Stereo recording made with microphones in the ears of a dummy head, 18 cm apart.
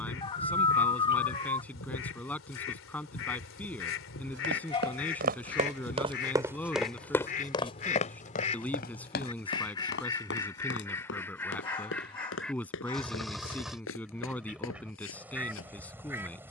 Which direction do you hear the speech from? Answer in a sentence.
In this clip you hear the speech in the centre.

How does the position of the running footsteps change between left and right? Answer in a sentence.
You can hear the running footsteps move from right to left.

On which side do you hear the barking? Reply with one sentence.
In this clip you hear the barking on the left.